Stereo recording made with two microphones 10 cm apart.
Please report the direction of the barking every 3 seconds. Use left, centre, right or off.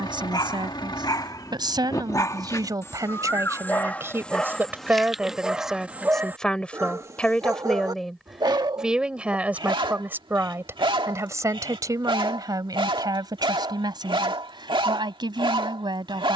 left, centre, right, right, right, right.